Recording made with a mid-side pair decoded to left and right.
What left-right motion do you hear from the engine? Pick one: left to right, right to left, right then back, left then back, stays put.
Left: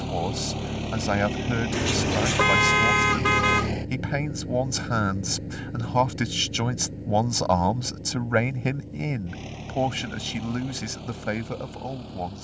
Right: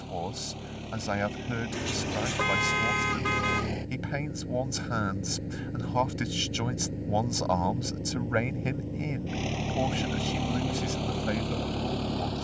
left to right.